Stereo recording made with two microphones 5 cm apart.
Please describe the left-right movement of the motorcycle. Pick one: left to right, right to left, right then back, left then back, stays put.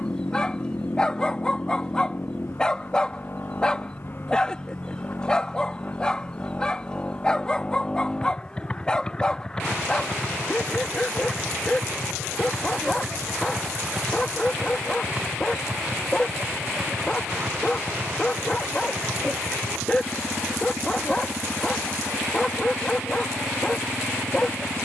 left to right.